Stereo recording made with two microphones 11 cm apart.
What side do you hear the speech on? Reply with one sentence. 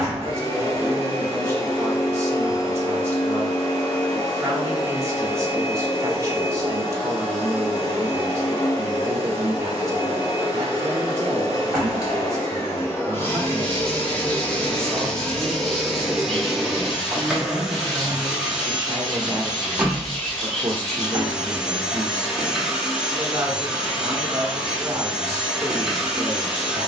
In this clip you hear the speech on the right.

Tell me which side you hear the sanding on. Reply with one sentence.
In this clip you hear the sanding in the centre.